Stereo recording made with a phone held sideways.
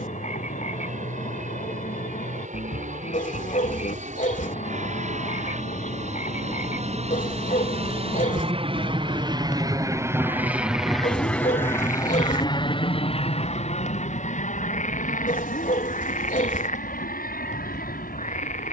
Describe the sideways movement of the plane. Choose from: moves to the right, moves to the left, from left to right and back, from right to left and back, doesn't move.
moves to the left.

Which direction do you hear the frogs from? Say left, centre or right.
left.